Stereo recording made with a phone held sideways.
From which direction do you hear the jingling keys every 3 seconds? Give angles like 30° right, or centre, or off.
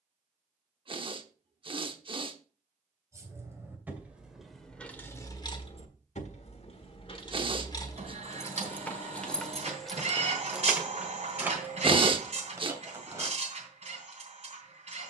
off, 10° left, 30° left, centre, 20° right.